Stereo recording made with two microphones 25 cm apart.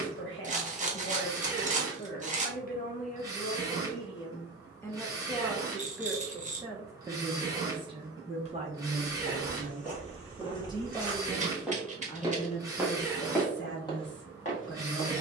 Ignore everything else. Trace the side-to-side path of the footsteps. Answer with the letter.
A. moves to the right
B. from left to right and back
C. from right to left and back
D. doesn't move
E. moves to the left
B.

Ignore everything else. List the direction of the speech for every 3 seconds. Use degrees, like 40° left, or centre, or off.
40° left, 20° left, 20° right, 20° right, 40° left.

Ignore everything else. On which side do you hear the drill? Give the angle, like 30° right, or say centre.
10° right.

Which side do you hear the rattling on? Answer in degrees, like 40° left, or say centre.
30° right.